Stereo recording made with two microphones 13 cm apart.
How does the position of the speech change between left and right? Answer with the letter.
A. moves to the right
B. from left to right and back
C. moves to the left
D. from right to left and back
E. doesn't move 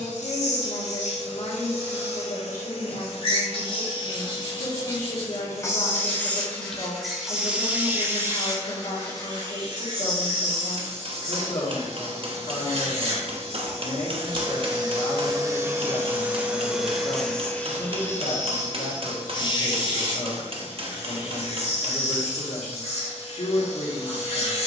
E.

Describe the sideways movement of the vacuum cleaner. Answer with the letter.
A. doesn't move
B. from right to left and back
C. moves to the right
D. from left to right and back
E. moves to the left
D.